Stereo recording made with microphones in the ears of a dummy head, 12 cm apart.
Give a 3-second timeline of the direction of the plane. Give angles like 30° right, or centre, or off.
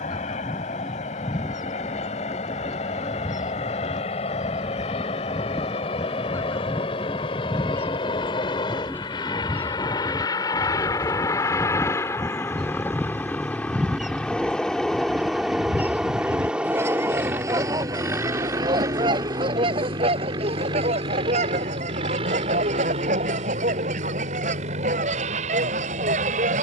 50° left, 50° left, 40° left, 30° left, 10° left, 10° right, 30° right, 40° right, 50° right.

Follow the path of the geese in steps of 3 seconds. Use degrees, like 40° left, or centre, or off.
30° left, 20° left, 20° left, 10° left, centre, 20° right, 40° right, 50° right, 50° right.